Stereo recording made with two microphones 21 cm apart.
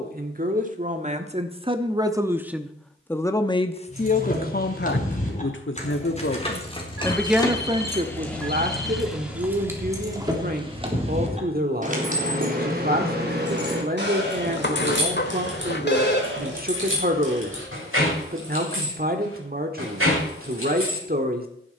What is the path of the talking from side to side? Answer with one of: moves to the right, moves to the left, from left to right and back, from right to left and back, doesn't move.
from right to left and back.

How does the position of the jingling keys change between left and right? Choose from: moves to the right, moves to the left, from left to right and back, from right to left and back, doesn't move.
moves to the right.